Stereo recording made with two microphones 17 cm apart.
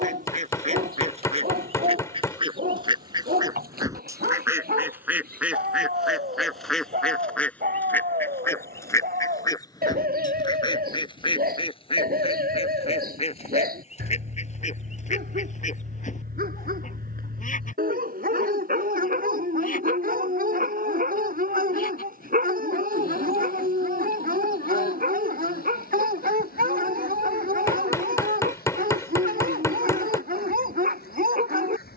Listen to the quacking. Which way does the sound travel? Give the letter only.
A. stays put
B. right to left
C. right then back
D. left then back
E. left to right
B.